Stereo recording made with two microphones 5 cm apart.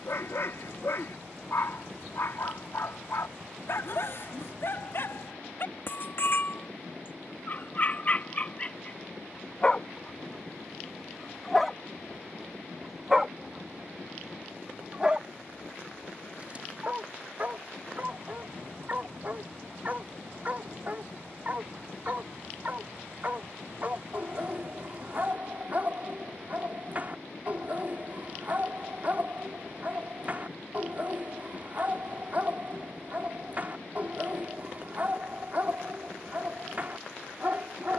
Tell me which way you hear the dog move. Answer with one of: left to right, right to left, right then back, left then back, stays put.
left to right.